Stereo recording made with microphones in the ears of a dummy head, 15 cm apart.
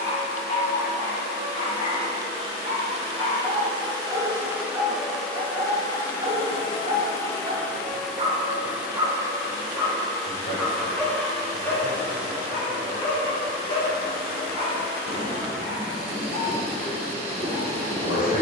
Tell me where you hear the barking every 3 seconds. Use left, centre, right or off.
left, centre, right, centre, left, left.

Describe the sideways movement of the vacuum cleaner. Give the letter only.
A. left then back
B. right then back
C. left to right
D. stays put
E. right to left
A.